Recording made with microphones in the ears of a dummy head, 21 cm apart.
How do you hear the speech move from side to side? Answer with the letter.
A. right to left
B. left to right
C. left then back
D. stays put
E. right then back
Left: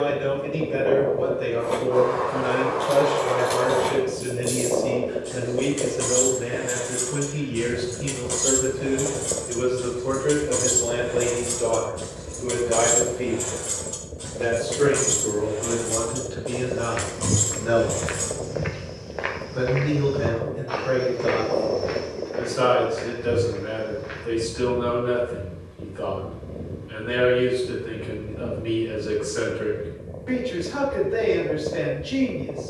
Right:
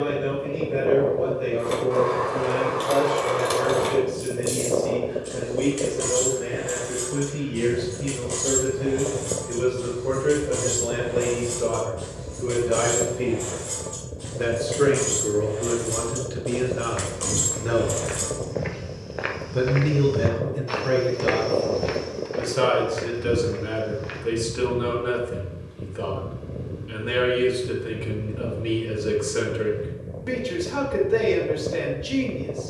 B.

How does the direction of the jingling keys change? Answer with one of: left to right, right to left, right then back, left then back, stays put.
left then back.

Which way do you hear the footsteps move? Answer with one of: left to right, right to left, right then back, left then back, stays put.
left to right.